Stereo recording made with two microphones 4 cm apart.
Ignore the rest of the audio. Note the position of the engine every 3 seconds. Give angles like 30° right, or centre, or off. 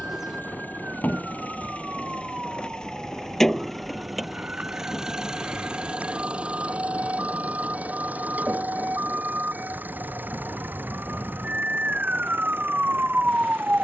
40° left, 10° right, 40° right, 50° right, 60° right.